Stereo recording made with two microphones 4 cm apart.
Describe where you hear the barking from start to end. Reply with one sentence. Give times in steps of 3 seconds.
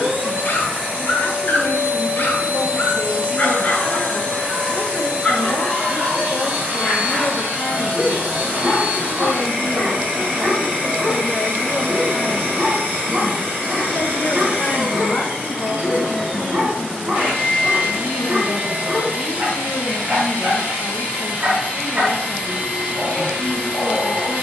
You can hear the barking on the left from 0 s, in the centre from 6 s and on the right from 9 s.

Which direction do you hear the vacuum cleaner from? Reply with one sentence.
You can hear the vacuum cleaner on the right.